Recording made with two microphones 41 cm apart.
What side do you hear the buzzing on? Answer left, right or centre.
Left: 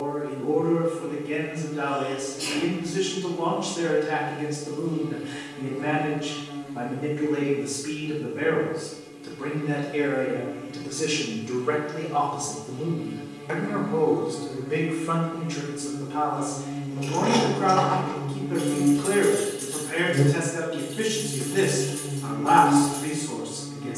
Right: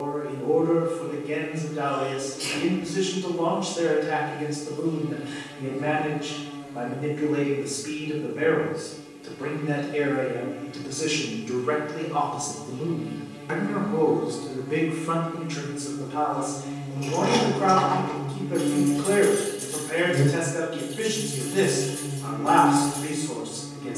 centre.